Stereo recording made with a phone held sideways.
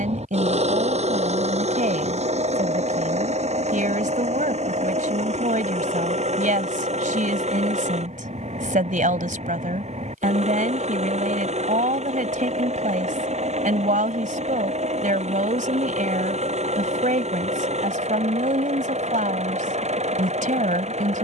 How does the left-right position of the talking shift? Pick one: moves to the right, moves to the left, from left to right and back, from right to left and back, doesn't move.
doesn't move.